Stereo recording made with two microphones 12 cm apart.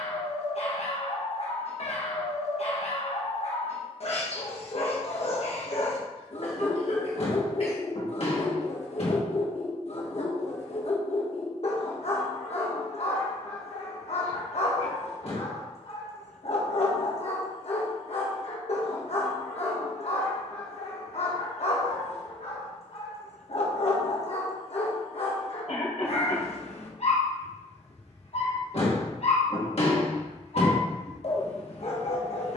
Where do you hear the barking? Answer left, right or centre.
left.